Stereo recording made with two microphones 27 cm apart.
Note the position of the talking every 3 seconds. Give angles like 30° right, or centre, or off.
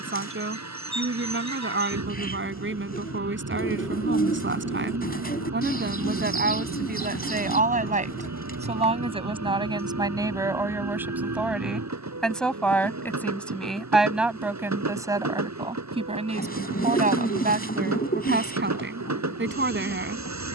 50° right, 40° right, 30° right, 10° right, centre, 20° right, 40° right.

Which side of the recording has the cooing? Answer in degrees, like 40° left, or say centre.
30° left.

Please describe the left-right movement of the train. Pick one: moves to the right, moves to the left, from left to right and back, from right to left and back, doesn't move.
doesn't move.